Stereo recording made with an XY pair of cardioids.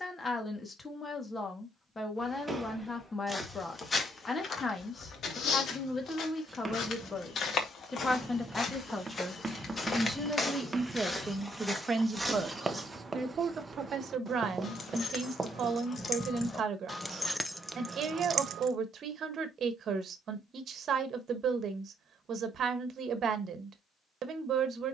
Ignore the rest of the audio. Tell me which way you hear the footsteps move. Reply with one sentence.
You can hear the footsteps go left and come back.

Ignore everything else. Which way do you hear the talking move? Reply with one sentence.
You can hear the talking travel towards the right.